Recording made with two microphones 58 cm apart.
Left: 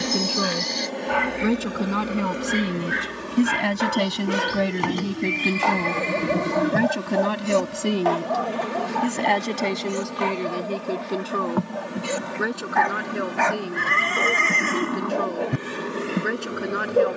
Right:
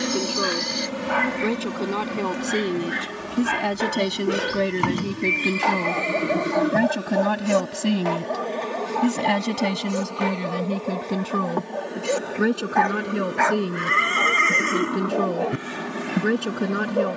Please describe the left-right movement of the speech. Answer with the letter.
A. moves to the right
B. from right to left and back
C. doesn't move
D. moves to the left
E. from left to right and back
A.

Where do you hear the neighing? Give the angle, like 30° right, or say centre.
20° left.